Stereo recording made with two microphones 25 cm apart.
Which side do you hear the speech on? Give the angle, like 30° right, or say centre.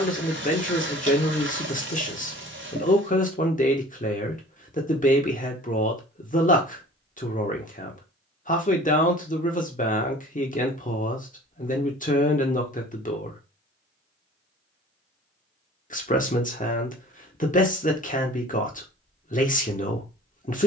30° left.